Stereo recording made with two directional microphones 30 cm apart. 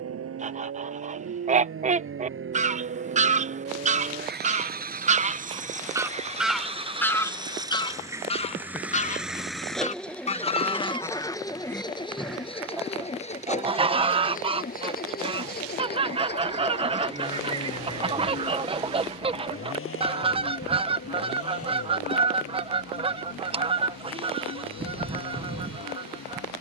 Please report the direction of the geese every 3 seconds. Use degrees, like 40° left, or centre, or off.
20° right, 20° right, 10° left, 20° left, 10° right, 20° right, 20° right, 20° right, 20° right.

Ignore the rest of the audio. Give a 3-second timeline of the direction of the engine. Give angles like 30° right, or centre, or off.
50° right, 30° right, 10° right, 10° left, 20° left, 30° left, 40° left, 50° left, 50° left.